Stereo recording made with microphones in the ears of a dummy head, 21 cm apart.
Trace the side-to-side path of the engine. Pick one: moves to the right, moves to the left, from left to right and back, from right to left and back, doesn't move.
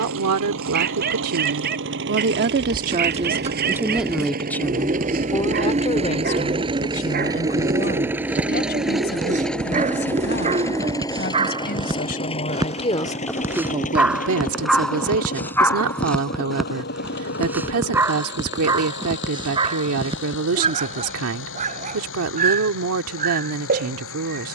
moves to the left.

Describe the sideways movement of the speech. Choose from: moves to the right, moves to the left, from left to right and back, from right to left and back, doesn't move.
from right to left and back.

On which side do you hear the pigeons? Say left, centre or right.
right.